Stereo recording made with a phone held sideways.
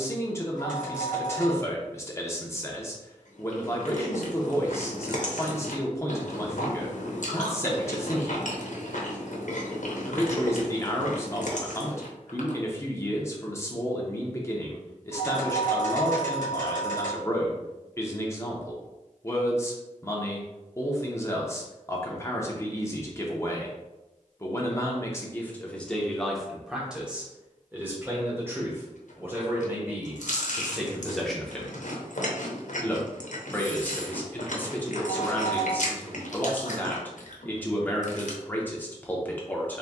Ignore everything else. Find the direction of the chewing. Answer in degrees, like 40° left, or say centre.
70° left.